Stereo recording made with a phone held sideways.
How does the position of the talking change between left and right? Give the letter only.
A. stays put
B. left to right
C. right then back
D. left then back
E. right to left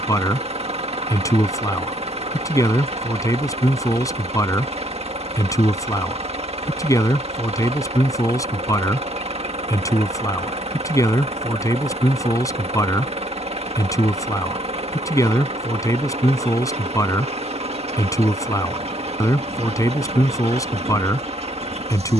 A.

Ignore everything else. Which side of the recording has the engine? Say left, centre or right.
right.